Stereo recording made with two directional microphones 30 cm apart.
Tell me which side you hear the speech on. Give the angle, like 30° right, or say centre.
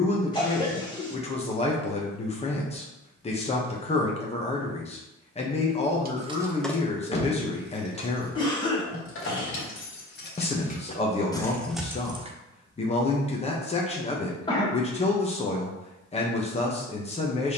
20° left.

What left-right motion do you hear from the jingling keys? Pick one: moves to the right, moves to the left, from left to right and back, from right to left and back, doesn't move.
from right to left and back.